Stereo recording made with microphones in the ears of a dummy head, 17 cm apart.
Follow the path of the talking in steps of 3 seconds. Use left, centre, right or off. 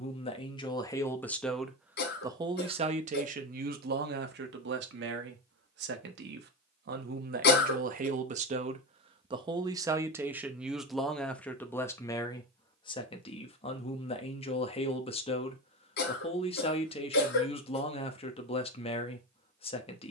centre, right, right, centre, left, left, left.